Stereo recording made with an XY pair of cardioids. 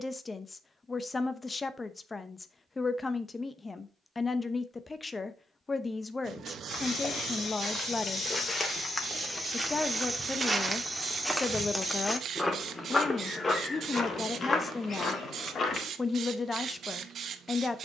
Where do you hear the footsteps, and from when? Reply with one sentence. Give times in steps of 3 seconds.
You can hear the footsteps not at all from 0 s, on the left from 6 s, in the centre from 9 s and on the left from 12 s.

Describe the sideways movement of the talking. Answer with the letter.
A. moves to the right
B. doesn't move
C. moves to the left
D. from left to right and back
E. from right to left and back
B.